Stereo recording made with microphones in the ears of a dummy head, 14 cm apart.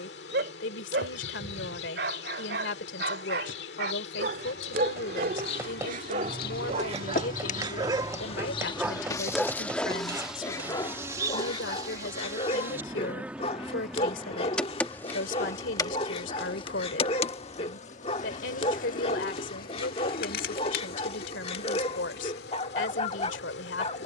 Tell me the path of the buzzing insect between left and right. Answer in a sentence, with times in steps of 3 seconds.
In this clip you hear the buzzing insect on the left from 0 s, in the centre from 9 s and on the left from 15 s.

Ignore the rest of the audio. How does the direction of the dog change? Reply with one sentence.
In this clip you hear the dog go from the right side to the left.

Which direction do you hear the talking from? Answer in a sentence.
In this clip you hear the talking on the left.